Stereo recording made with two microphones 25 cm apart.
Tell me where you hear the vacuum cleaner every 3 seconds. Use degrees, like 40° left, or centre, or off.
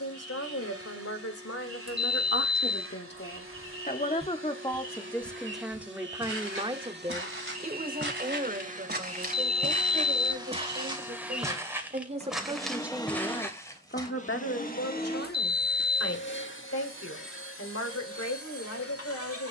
60° right, 50° right, 40° right, 20° right, 20° left, 50° left, 60° left.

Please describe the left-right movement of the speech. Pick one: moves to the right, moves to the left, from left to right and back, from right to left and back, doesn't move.
from left to right and back.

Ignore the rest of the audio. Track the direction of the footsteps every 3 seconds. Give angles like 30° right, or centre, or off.
off, 20° right, 50° right, 20° right, 10° left, off, off.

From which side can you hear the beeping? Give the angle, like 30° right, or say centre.
20° right.